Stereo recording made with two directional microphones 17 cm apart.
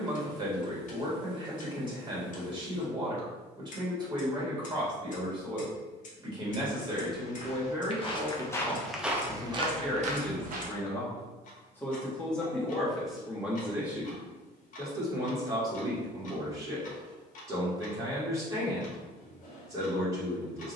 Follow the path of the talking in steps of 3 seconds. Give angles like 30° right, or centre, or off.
30° right, 30° right, 20° right, 10° left, centre, 20° right, 20° right.